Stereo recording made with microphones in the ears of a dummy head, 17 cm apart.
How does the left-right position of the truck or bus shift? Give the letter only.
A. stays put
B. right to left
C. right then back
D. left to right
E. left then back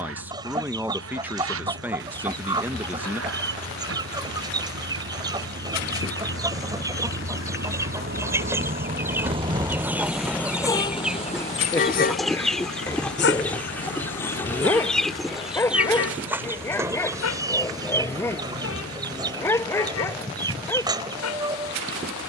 B.